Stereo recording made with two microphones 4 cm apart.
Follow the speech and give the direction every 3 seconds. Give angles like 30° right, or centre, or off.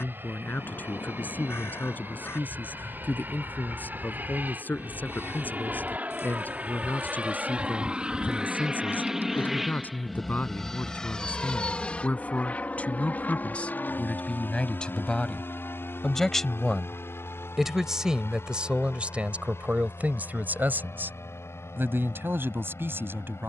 50° left, 50° left, 50° left, 40° left, 30° left, centre, 40° right, 70° right.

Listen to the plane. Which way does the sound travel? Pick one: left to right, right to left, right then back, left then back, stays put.
right to left.